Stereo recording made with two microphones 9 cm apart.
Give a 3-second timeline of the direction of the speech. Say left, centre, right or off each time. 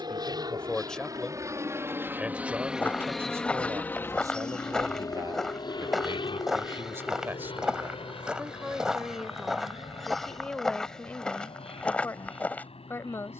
centre, right, right, centre, left.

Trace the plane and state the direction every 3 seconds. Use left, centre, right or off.
right, left, left, left, left.